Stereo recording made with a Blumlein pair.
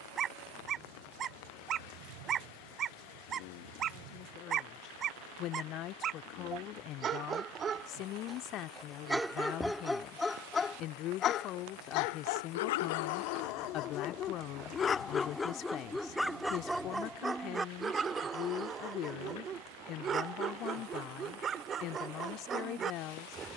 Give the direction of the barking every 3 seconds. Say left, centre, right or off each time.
right, right, right, centre, left, centre, right, right.